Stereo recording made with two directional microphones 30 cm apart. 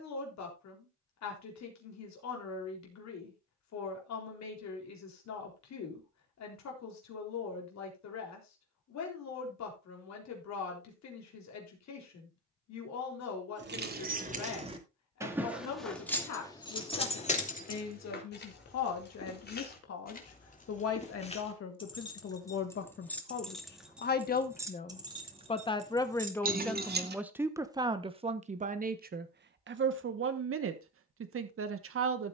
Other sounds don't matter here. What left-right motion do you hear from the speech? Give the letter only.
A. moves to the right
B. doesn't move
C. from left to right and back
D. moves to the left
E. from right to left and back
A.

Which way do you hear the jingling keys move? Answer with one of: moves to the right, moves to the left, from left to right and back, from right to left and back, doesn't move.
from right to left and back.